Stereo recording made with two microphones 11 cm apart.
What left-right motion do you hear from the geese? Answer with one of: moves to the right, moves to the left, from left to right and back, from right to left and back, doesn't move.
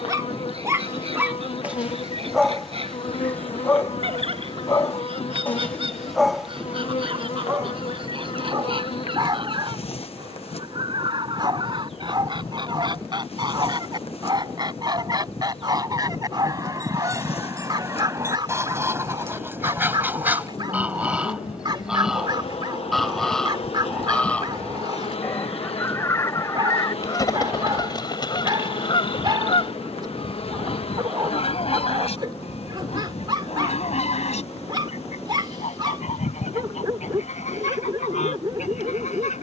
moves to the left.